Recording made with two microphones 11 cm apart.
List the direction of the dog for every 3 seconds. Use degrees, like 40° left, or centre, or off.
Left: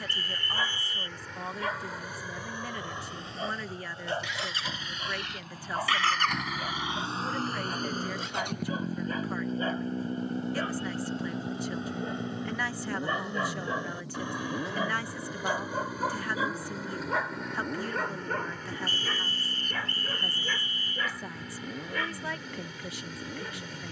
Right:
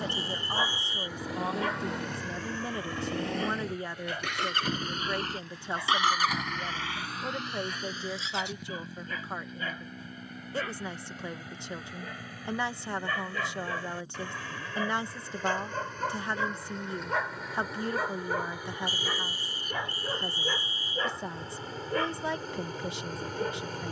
centre, 30° left, 40° left, 30° left, 20° left, 10° left, 20° right, 40° right.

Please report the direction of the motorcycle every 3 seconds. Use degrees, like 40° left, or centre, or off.
70° right, 50° right, 30° left, 70° left, 80° left, 80° left, 80° left, 80° left.